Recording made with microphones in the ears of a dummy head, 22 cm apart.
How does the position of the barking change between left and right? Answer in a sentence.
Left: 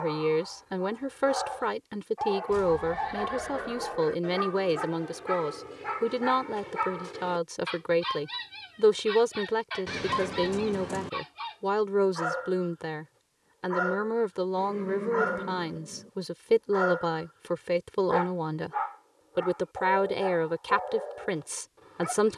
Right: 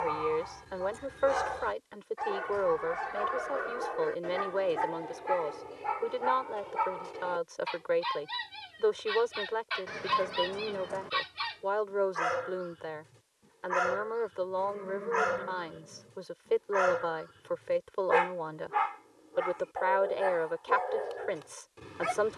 In this clip you hear the barking move from right to left and back again.